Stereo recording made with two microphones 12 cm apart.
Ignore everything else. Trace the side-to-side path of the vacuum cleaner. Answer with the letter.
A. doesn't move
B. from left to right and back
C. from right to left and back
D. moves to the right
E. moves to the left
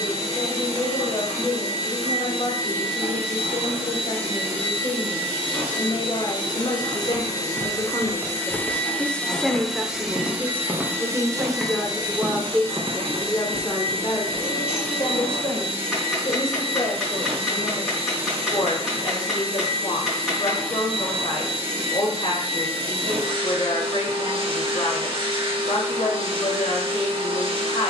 D.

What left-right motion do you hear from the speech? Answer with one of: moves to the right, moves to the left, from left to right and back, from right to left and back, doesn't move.
from left to right and back.